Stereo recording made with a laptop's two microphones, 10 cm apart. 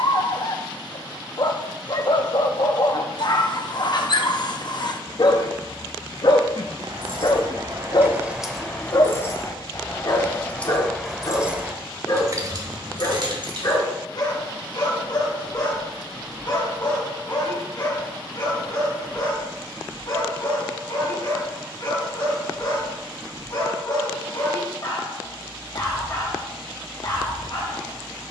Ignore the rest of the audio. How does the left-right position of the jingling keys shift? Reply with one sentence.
You can hear the jingling keys move from right to left and back again.